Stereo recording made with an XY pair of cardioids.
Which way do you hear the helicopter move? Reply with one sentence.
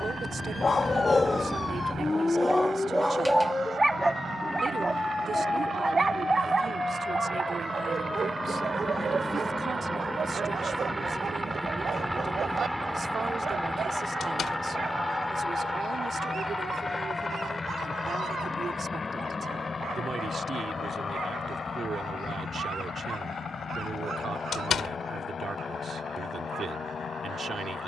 In this clip you hear the helicopter go from the right side to the left.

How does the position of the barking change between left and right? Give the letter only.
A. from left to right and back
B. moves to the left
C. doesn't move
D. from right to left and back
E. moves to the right
E.